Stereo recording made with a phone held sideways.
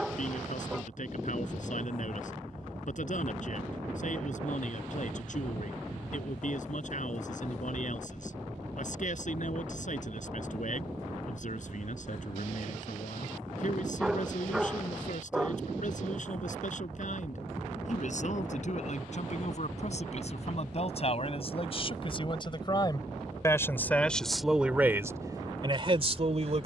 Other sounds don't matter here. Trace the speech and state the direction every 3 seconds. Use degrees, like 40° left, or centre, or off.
60° left, 60° left, 60° left, 60° left, 60° left, 60° left, 50° left, 30° left, 20° right.